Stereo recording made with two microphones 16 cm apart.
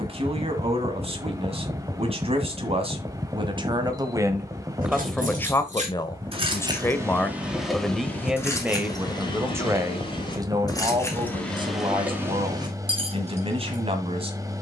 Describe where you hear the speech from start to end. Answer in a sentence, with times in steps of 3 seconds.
You can hear the speech on the right from 0 s, in the centre from 3 s and on the right from 9 s.